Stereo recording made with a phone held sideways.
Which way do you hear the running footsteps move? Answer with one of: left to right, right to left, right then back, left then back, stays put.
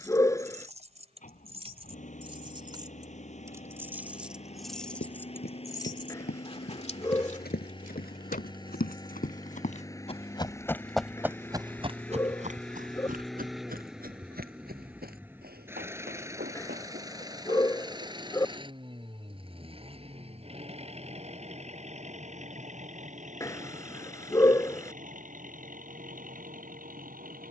left to right.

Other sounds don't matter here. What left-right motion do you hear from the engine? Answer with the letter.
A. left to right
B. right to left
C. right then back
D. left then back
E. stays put
A.